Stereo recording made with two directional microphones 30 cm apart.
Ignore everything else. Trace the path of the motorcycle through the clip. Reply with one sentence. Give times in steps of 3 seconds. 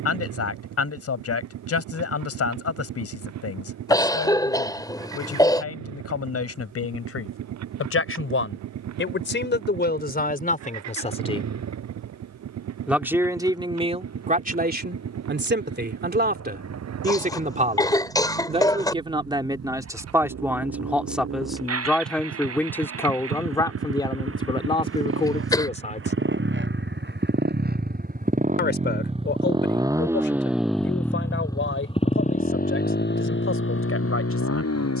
In this clip you hear the motorcycle on the right from 0 s, in the centre from 30 s and on the left from 33 s.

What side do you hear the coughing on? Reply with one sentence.
In this clip you hear the coughing in the centre.